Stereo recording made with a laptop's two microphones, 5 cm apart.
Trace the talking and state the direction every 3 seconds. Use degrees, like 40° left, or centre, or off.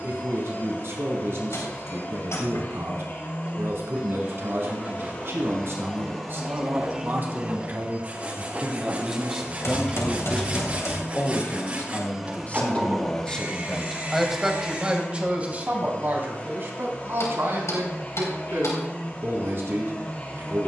60° right, 60° right, 40° right, 10° left, 10° left, 40° right, 60° right.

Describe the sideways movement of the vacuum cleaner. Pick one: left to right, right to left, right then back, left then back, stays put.
right then back.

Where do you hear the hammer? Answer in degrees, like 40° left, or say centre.
70° left.